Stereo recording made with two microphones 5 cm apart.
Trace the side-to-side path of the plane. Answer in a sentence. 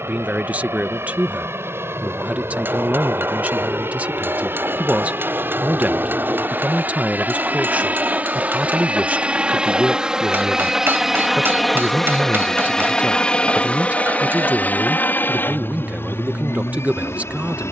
In this clip you hear the plane move from right to left.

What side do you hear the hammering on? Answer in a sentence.
You can hear the hammering on the right.